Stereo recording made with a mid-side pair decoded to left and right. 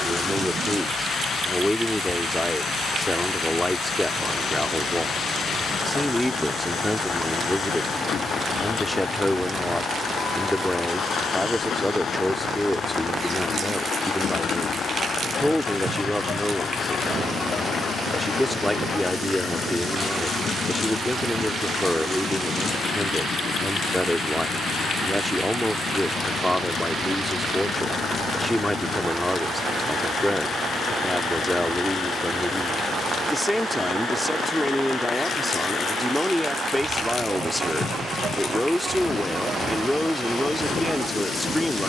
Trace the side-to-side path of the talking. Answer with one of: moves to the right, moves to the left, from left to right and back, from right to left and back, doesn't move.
doesn't move.